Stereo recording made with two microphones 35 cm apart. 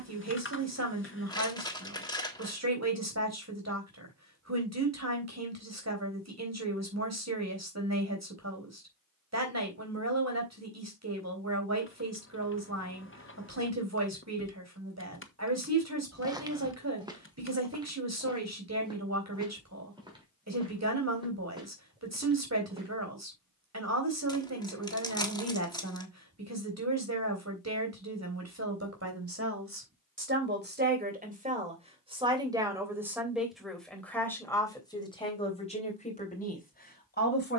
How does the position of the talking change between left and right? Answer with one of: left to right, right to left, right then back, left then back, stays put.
right to left.